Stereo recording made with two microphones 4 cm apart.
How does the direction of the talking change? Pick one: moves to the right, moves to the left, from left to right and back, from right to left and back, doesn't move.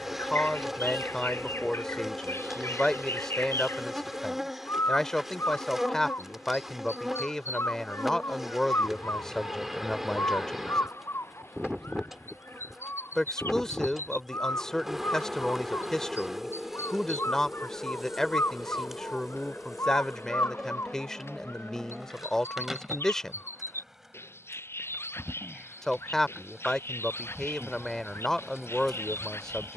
doesn't move.